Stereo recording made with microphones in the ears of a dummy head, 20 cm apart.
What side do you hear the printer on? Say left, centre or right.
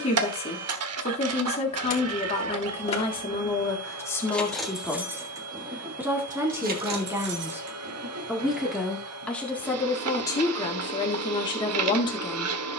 right.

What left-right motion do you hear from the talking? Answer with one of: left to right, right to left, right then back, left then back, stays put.
right then back.